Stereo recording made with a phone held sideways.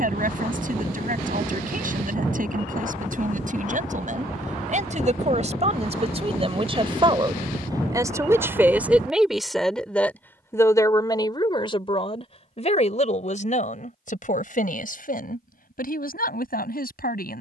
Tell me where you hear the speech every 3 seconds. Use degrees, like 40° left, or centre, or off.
60° right, 50° right, 20° right, 20° left, 50° left, 60° left.